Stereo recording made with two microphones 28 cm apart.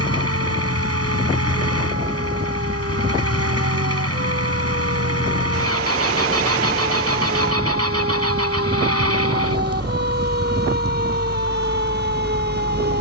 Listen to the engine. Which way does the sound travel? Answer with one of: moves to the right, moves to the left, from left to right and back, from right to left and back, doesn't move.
doesn't move.